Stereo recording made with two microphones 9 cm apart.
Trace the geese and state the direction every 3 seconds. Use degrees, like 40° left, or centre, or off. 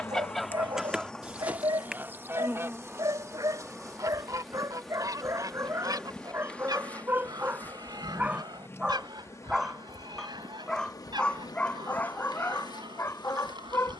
10° right, 40° right, 50° right, 60° right, 60° right.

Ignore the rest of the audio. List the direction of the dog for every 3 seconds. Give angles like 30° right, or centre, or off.
50° right, 40° right, 20° right, 10° left, 30° left.